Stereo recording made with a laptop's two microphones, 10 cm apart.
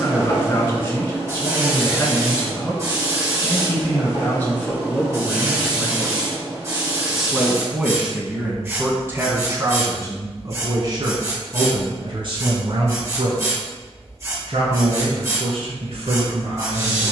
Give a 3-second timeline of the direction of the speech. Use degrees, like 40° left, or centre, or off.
20° left, 20° left, 10° right, 30° right, 60° right, 60° right.